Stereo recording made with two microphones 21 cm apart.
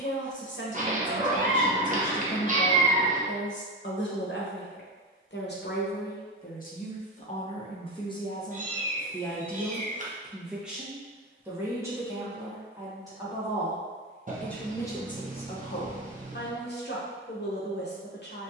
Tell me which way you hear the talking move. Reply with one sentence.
In this clip you hear the talking go right and come back.